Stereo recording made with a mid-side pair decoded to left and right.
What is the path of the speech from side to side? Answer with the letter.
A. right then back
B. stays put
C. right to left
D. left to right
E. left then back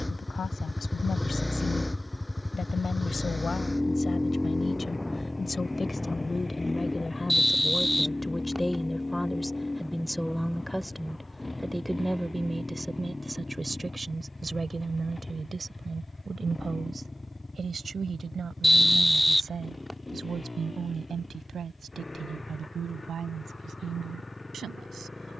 D.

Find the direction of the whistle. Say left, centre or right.
centre.